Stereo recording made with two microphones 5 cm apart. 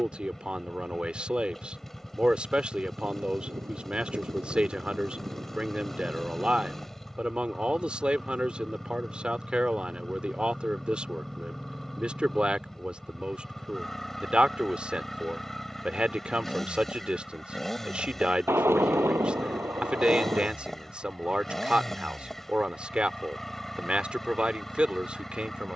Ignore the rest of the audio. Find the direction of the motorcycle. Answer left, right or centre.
centre.